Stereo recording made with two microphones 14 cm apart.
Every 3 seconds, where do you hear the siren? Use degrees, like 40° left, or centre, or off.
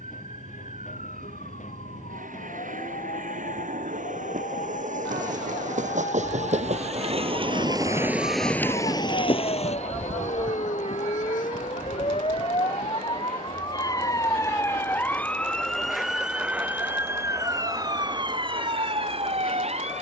70° left, 70° left, 60° left, 50° left, 30° left, 10° right, 40° right.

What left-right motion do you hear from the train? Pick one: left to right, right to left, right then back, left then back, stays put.
right to left.